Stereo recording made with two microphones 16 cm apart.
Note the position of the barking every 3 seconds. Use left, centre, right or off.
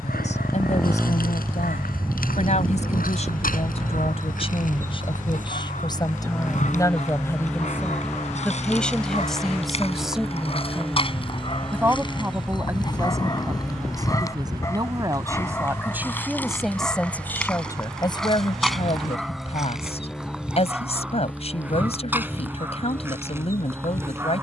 left, left, left, left, left, centre, centre, centre.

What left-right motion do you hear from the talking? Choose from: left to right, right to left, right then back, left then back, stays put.
right then back.